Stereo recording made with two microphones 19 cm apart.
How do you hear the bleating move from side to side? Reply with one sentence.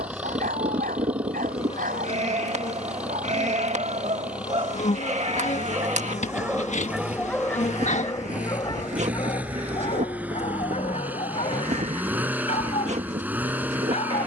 You can hear the bleating stay put.